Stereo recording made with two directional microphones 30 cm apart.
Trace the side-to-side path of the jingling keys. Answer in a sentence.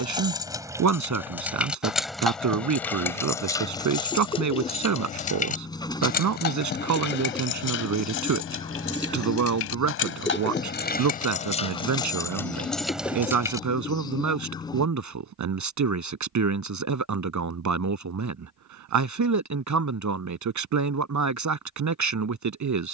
In this clip you hear the jingling keys go left and come back.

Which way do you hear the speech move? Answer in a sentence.
In this clip you hear the speech stay in one place.